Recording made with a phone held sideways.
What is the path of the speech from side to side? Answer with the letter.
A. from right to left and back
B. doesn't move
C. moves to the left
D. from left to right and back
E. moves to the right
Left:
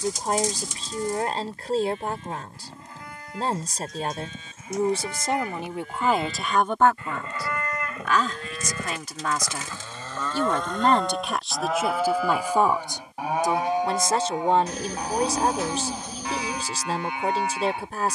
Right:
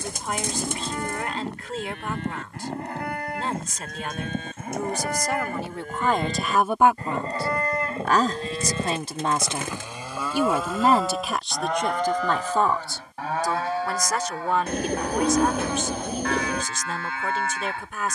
D.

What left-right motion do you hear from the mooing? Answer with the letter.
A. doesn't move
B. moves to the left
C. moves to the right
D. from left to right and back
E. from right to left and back
B.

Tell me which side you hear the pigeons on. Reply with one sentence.
You can hear the pigeons on the right.